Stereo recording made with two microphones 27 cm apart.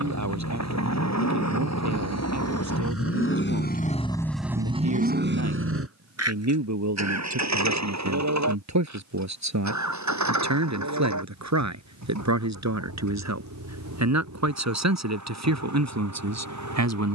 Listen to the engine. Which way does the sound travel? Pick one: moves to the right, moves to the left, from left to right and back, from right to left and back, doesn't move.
moves to the right.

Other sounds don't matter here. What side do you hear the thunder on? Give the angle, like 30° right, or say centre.
70° left.